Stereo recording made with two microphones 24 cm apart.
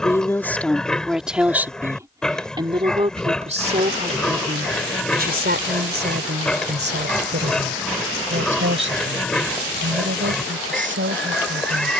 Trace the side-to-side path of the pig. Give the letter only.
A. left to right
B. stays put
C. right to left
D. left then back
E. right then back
B.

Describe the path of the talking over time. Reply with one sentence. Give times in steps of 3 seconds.
You can hear the talking in the centre from 0 s and on the right from 3 s.